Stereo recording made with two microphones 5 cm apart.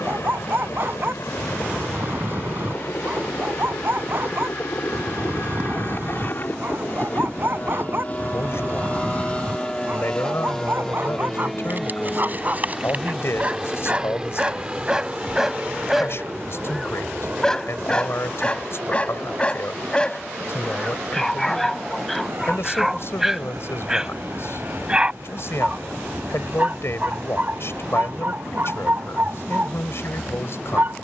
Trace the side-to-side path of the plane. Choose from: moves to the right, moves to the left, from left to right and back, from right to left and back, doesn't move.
moves to the right.